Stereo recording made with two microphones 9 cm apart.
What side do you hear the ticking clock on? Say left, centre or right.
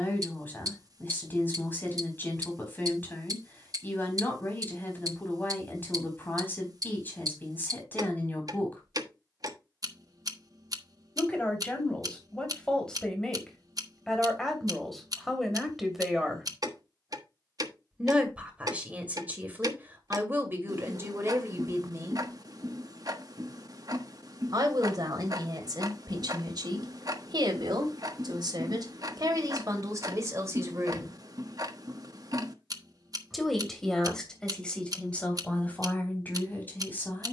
right.